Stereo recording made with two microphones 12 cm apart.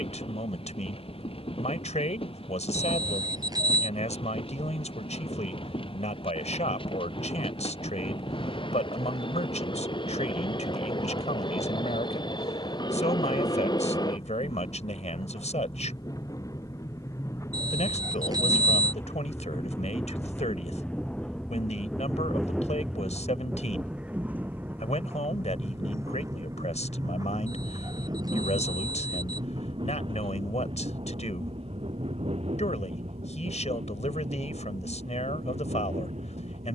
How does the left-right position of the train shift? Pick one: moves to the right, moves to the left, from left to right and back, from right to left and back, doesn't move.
moves to the right.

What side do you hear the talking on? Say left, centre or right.
left.